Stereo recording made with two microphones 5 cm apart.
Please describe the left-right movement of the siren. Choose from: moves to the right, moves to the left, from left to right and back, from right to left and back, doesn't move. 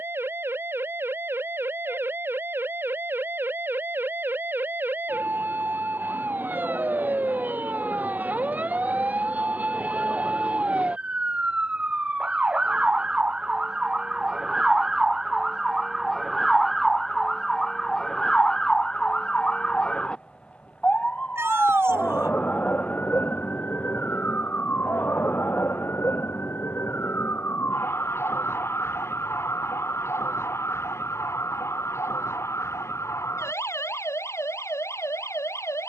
moves to the left.